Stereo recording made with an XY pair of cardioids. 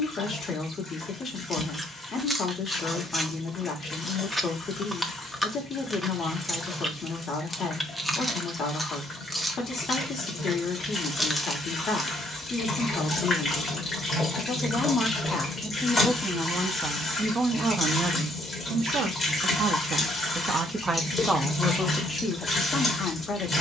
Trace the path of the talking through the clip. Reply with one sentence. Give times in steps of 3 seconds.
In this clip you hear the talking on the left from 0 s, in the centre from 15 s, on the right from 18 s and on the left from 21 s.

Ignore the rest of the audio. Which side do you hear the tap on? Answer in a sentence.
In this clip you hear the tap on the left.